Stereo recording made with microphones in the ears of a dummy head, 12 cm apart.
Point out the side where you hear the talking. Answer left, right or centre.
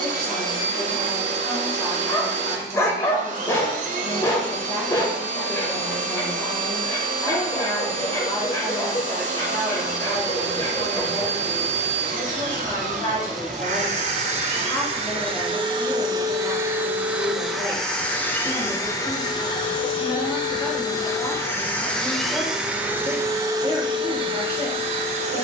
left.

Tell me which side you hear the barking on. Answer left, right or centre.
left.